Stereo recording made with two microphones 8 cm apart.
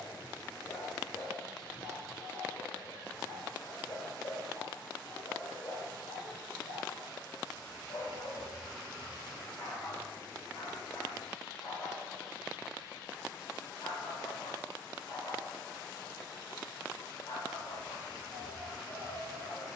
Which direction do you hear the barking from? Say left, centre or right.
left.